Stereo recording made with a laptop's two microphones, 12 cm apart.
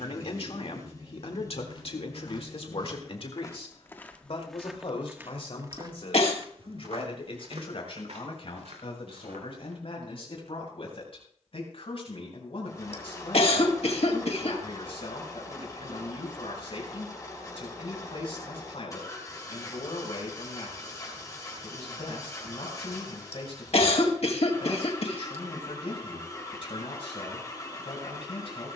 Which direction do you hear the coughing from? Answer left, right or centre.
left.